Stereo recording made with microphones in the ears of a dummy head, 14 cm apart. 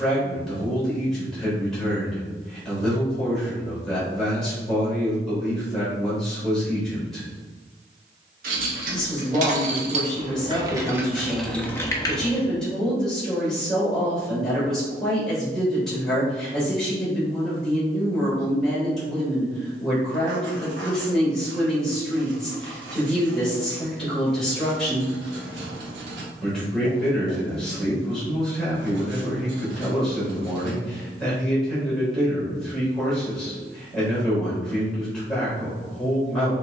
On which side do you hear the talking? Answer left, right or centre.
centre.